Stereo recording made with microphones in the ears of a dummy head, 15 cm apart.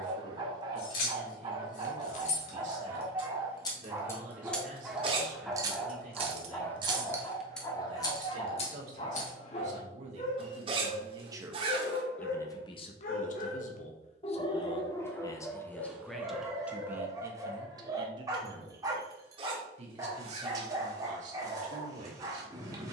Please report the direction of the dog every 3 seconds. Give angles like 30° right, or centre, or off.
30° right, 10° right, 20° left, 40° left, 40° left, 10° right, 20° right, 20° right.